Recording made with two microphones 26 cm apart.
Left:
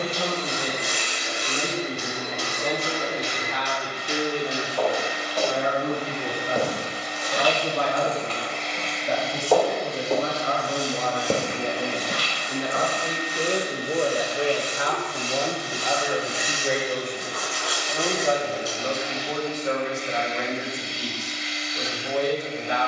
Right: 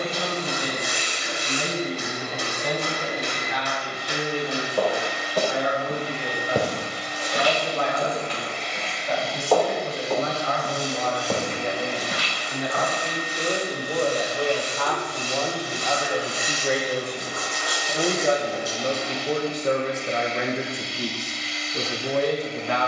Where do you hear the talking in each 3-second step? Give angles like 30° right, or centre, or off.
50° left, 50° left, 50° left, 40° left, 20° left, centre, 40° right, 60° right.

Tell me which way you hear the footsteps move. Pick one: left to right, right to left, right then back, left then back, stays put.
right to left.